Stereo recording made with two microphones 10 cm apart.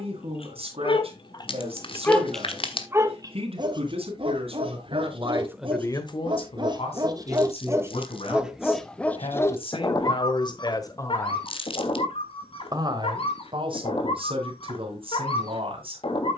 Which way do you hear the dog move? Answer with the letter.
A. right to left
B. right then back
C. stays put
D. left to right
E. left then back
B.